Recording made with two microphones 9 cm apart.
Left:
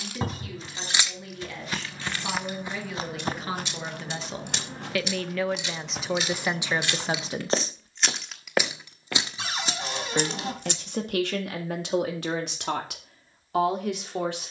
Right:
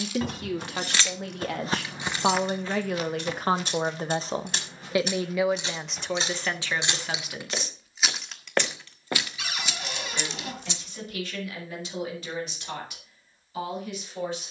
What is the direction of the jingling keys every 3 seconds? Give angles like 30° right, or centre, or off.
centre, 40° right, 20° right, 40° left, off.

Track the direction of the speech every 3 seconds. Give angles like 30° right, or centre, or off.
60° right, 30° right, 20° left, 60° left, 70° left.